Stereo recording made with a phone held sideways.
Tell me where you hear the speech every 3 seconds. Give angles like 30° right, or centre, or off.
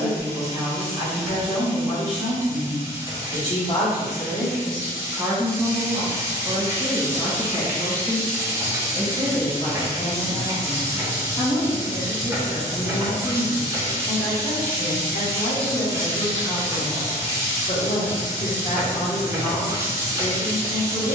50° left, 10° left, 20° right, 10° left, 40° left, 50° left, 50° left.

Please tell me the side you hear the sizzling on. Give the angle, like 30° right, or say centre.
20° right.